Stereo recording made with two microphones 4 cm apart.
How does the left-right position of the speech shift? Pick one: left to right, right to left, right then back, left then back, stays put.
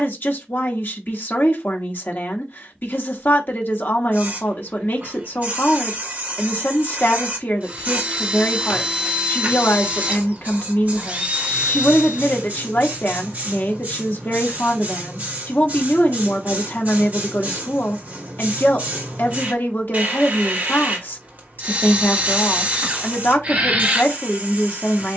stays put.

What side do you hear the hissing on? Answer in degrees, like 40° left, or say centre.
40° right.